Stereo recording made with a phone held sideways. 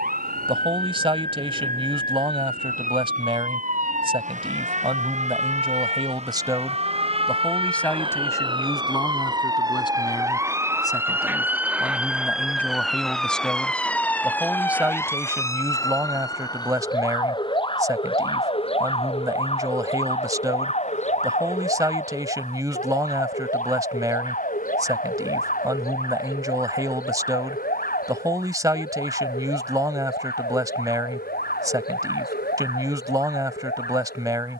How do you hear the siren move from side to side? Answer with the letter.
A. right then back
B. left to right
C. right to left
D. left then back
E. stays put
C.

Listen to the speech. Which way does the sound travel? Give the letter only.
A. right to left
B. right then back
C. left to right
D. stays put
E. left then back
E.